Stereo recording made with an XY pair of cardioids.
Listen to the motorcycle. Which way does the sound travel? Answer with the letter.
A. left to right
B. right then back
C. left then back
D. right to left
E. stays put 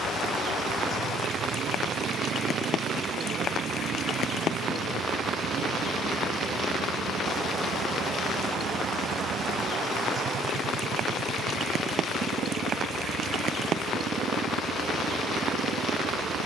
E.